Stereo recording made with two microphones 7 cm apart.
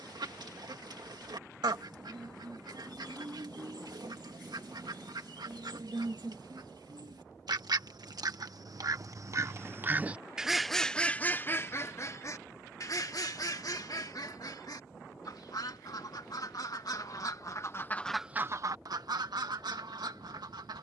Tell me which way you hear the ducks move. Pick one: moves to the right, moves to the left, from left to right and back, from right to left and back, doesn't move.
from right to left and back.